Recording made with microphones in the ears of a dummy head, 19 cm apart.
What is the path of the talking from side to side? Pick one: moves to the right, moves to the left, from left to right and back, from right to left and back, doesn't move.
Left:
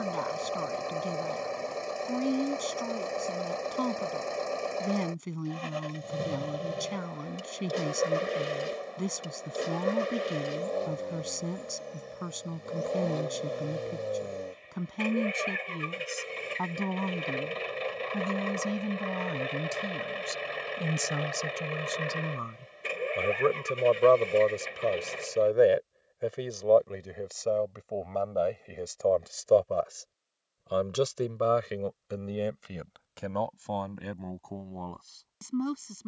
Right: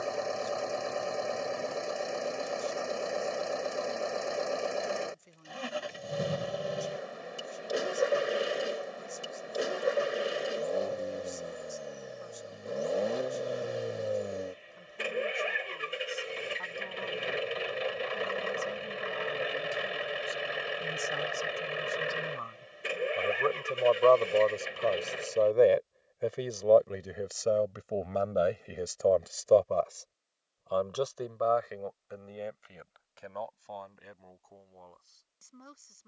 from left to right and back.